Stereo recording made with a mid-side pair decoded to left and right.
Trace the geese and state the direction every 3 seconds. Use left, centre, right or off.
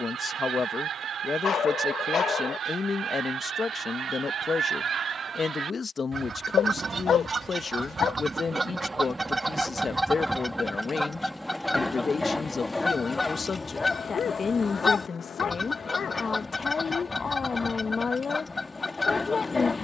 right, right, right, centre, left, left, left.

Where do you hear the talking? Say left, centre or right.
left.